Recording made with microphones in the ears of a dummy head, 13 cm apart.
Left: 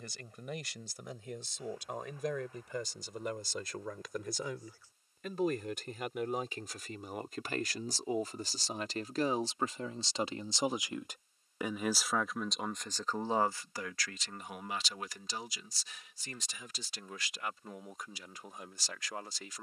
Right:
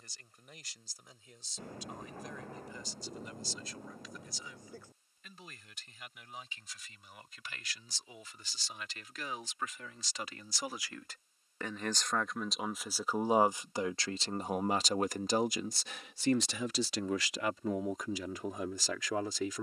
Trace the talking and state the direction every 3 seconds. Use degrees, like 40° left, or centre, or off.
60° left, 50° left, 40° left, 20° left, 20° right, 60° right, 70° right.